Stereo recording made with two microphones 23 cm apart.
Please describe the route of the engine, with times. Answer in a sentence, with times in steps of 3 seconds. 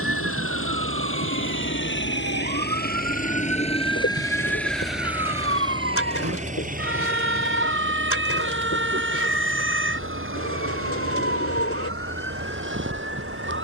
You can hear the engine on the left from 0 s, in the centre from 3 s and on the right from 6 s.